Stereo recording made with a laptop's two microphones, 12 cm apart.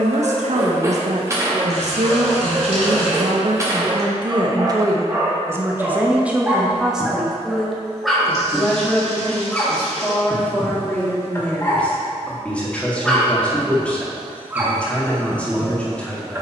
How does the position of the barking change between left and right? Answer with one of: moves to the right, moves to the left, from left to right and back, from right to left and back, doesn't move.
from right to left and back.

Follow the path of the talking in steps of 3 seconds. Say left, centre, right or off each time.
right, right, centre, centre, centre, centre.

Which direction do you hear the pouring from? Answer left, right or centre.
right.